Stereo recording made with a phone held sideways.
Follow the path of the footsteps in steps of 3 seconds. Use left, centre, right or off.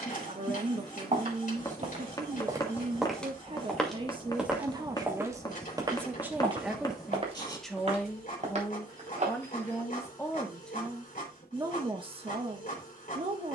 right, centre, right, right, off.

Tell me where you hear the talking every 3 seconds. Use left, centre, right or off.
right, right, centre, centre, right.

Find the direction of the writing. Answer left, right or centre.
left.